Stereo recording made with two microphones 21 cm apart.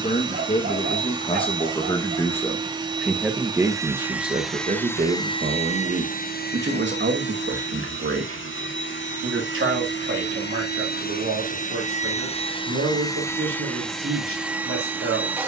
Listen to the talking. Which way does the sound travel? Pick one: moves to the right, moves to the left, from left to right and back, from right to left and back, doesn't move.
moves to the right.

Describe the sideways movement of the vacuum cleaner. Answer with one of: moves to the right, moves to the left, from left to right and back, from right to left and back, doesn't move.
from right to left and back.